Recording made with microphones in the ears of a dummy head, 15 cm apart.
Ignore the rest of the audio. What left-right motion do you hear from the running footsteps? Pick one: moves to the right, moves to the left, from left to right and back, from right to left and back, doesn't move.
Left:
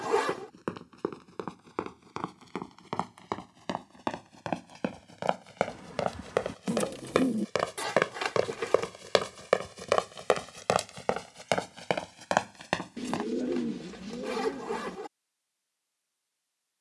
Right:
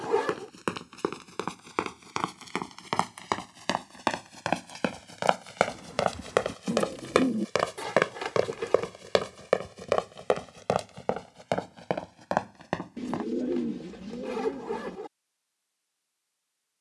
moves to the left.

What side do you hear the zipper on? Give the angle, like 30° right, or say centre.
40° left.